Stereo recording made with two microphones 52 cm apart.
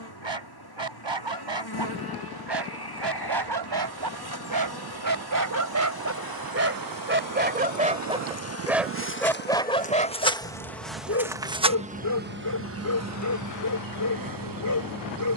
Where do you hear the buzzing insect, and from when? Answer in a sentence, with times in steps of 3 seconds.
You can hear the buzzing insect on the left from 0 s, in the centre from 9 s and on the right from 12 s.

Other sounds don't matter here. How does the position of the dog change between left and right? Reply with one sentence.
In this clip you hear the dog travel towards the left.